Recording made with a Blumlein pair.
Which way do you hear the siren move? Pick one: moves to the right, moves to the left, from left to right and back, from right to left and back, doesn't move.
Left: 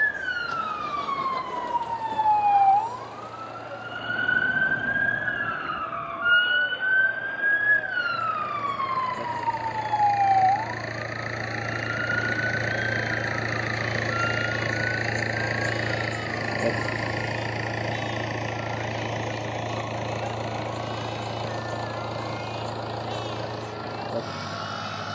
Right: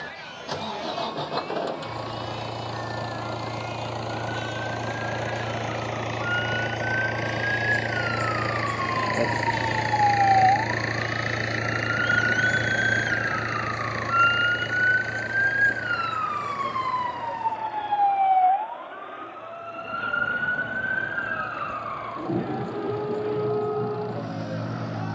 moves to the right.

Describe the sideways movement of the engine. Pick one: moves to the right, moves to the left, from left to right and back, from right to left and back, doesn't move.
moves to the left.